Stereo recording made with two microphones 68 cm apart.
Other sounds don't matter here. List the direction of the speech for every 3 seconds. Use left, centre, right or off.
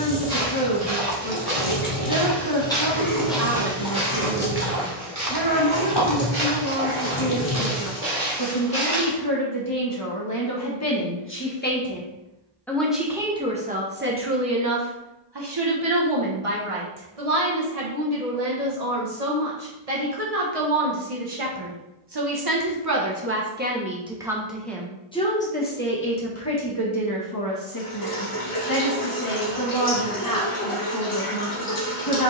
left, left, left, left, centre, right, right, right, centre, left, left.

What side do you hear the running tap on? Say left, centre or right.
left.